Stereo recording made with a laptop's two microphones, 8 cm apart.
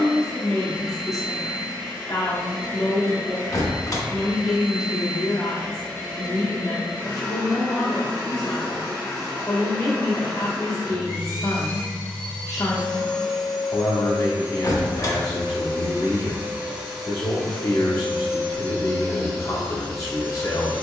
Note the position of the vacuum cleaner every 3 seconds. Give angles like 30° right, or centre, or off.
40° left, 40° left, 40° left, 30° left, centre, 20° right, 30° left.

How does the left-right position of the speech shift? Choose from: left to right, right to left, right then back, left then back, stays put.
stays put.